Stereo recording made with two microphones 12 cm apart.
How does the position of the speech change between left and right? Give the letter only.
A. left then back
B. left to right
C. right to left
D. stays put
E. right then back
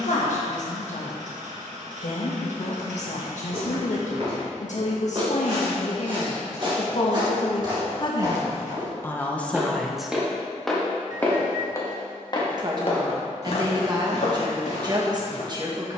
B.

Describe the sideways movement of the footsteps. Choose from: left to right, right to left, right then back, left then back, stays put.
right to left.